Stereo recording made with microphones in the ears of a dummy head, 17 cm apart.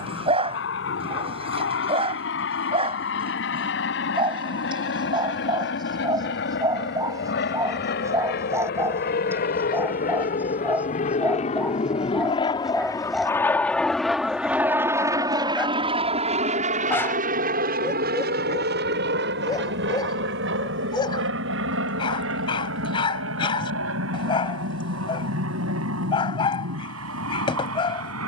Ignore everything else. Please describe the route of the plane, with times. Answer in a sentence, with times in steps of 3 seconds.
You can hear the plane on the left from 0 s, in the centre from 12 s and on the right from 15 s.